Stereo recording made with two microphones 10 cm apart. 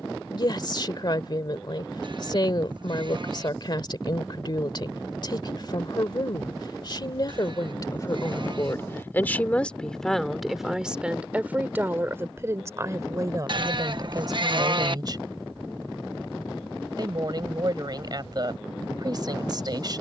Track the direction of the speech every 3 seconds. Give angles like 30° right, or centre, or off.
50° left, 50° left, 40° left, centre, 40° right, 40° right, 40° right.